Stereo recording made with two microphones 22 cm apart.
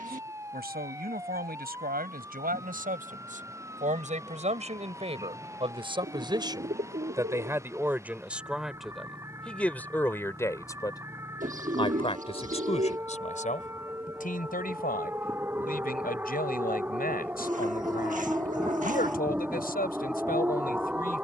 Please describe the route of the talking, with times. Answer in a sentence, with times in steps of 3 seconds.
In this clip you hear the talking on the right from 0 s, in the centre from 6 s and on the left from 12 s.